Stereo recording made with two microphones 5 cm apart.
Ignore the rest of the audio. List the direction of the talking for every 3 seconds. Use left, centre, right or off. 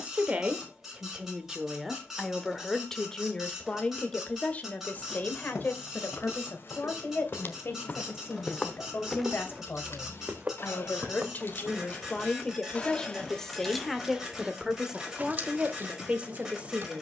centre, left, left, left, centre, right.